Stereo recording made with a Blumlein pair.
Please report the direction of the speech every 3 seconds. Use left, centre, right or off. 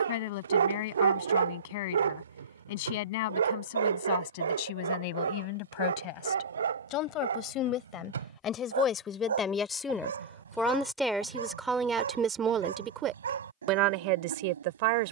left, left, left, centre, right.